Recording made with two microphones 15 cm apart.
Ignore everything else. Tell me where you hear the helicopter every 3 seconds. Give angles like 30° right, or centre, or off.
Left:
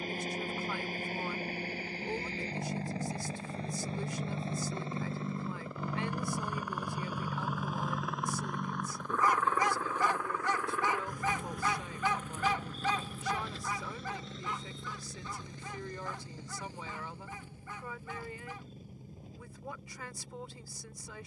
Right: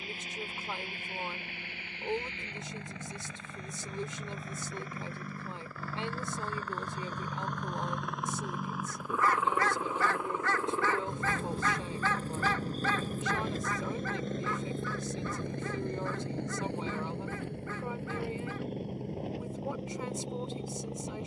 40° left, 30° left, 10° left, 20° right, 40° right, 60° right, 70° right.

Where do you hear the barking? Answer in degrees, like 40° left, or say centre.
20° left.